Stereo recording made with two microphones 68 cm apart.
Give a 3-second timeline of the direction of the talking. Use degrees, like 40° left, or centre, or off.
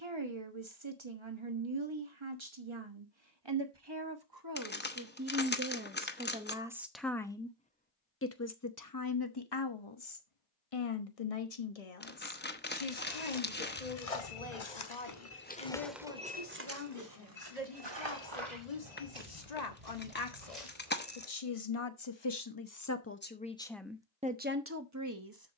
40° right, 30° right, 10° left, 50° left, 70° left, 80° left, 70° left, 30° left, 20° right.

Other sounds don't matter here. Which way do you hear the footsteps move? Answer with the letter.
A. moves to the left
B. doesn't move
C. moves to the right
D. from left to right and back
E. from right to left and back
C.